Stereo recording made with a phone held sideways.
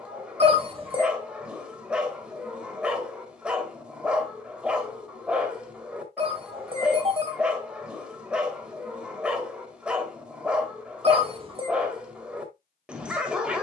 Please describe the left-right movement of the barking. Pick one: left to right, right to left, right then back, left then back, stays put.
stays put.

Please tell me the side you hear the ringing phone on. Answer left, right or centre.
right.